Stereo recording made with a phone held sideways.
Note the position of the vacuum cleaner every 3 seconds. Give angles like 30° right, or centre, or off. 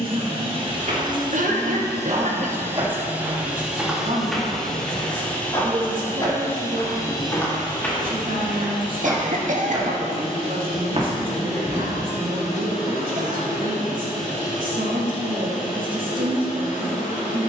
30° right, centre, 30° left, 40° left, 50° left, 60° left.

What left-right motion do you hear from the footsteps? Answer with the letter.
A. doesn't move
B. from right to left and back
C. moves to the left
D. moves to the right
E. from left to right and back
B.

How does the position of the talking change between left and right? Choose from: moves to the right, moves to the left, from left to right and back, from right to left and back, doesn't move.
doesn't move.